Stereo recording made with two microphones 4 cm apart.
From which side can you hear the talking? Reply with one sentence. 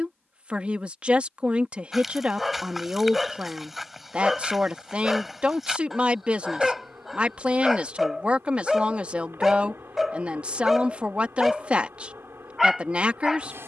In this clip you hear the talking on the right.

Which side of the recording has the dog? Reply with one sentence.
You can hear the dog in the centre.